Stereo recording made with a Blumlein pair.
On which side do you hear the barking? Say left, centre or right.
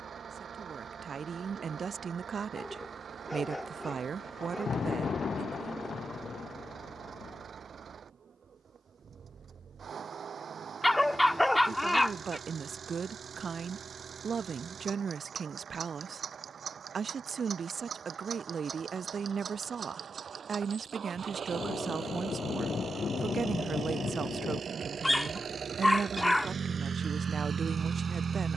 centre.